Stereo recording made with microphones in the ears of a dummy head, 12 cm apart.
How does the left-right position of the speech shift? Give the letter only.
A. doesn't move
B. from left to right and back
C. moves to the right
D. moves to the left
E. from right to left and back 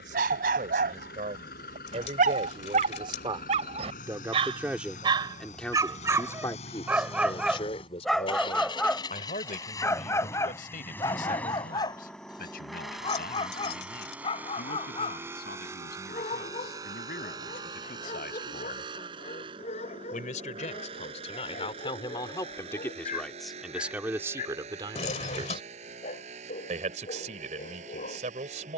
E.